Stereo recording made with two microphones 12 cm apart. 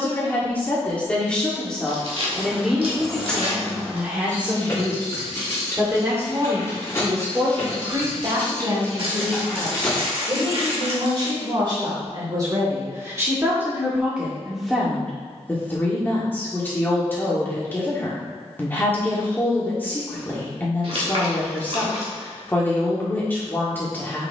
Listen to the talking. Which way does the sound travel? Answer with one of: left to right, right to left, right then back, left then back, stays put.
right then back.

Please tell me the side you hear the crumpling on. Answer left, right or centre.
right.